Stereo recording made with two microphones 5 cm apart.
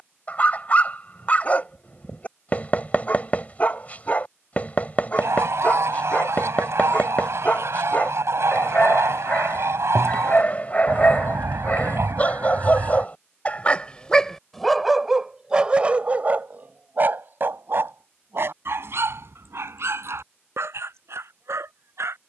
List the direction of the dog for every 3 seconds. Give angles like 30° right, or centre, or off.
30° left, 30° left, 30° left, 30° left, 20° left, 30° right, 60° right, 70° right.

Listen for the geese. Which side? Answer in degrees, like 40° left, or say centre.
70° right.